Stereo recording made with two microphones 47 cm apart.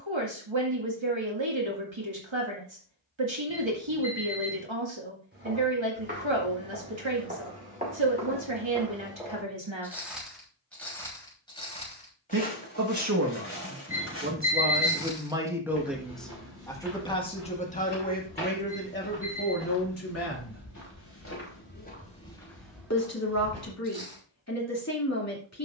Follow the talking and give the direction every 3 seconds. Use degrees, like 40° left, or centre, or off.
70° right, 70° right, 70° right, 70° right, 30° right, centre, 30° left, 30° left, 30° left.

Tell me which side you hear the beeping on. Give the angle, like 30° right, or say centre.
30° right.